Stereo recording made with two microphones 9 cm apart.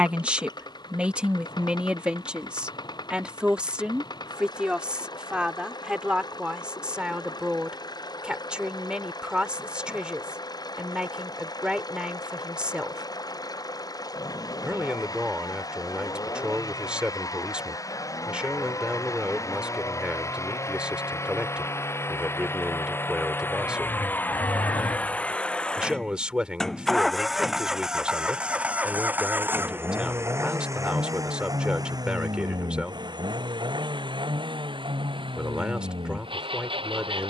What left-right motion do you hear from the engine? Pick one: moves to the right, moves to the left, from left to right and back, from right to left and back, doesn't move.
moves to the right.